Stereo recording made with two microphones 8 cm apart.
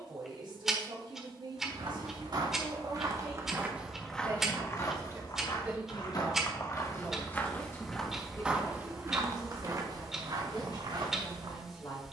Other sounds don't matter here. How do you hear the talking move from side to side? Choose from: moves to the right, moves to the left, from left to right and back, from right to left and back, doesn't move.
moves to the left.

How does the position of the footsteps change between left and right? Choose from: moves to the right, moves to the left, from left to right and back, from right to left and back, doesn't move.
from right to left and back.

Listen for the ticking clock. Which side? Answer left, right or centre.
centre.